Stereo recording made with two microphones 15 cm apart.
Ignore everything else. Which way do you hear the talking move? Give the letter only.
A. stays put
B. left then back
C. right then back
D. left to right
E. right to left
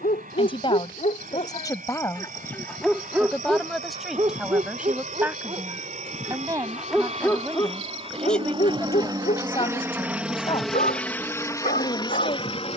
C.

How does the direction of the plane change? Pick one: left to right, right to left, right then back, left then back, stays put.
right to left.